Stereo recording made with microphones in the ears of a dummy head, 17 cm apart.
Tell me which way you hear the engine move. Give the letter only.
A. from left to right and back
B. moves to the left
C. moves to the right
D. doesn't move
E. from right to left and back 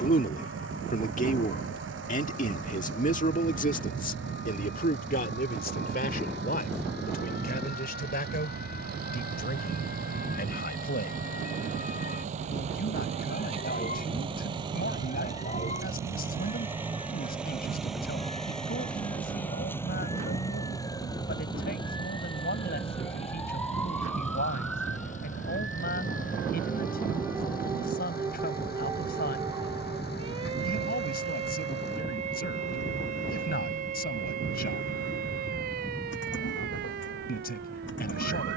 B.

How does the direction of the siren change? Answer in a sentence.
You can hear the siren go from the left side to the right.